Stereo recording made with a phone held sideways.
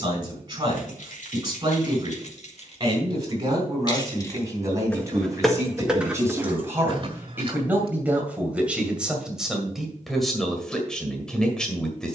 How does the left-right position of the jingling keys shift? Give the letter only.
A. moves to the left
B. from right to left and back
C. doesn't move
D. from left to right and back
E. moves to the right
E.